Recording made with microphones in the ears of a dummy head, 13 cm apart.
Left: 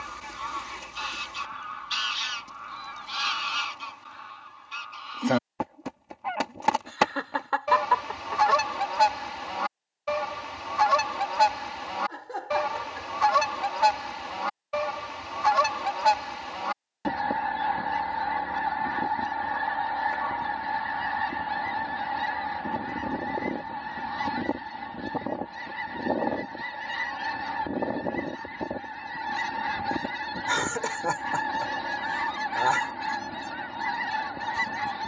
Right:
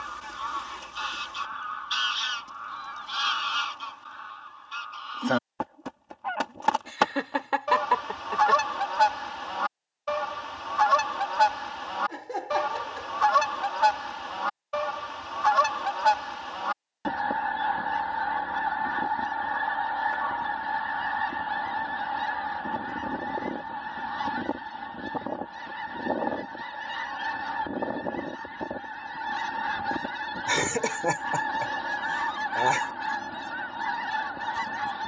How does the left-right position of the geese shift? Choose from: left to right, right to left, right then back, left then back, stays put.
stays put.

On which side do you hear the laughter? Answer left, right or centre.
right.